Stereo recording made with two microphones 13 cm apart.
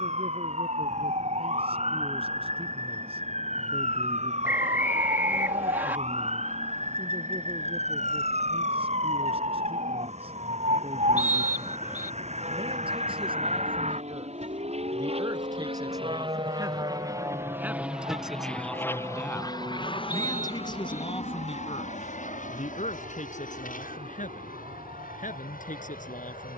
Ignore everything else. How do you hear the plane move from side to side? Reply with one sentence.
In this clip you hear the plane move from right to left.